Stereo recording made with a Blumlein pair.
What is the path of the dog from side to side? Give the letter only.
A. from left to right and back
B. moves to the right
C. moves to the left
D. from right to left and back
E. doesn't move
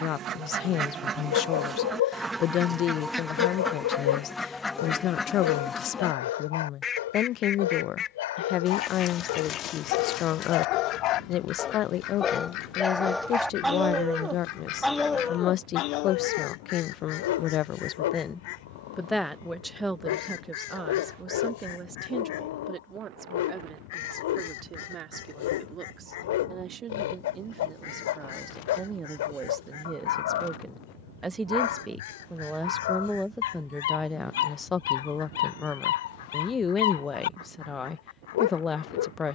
A.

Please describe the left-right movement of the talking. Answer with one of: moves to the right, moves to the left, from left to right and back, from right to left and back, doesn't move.
from left to right and back.